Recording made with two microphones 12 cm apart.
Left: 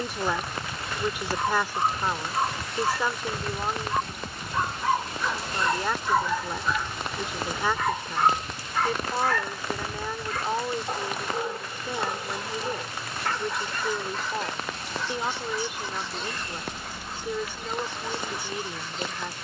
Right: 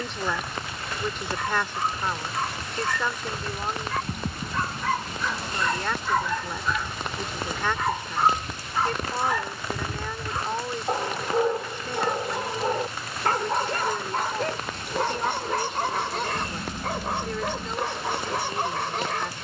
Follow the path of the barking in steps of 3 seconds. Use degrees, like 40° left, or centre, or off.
20° left, 20° left, centre, 30° right, 50° right, 60° right, 70° right.